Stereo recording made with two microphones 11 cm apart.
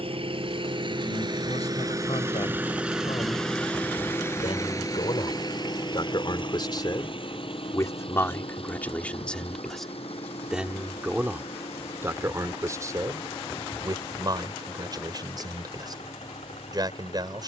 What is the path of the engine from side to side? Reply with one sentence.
You can hear the engine travel towards the left.